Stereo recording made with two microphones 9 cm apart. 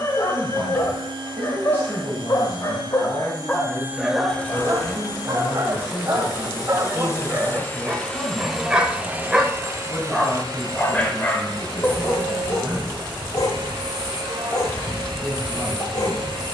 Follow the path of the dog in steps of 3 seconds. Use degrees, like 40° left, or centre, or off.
40° left, 10° right, 20° right, 10° left, 40° left, 40° left.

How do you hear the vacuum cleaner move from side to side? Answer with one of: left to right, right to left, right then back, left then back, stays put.
left then back.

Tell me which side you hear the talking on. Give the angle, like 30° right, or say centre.
20° left.